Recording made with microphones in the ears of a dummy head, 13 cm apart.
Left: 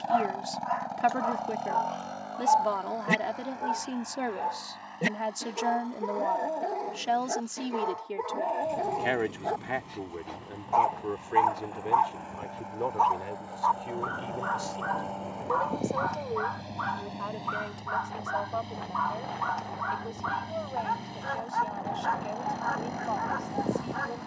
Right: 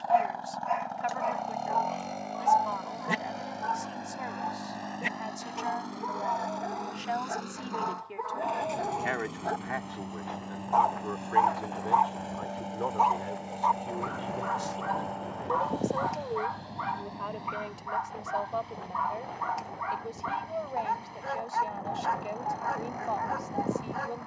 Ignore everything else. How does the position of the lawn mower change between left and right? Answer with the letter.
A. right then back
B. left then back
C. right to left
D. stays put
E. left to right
A.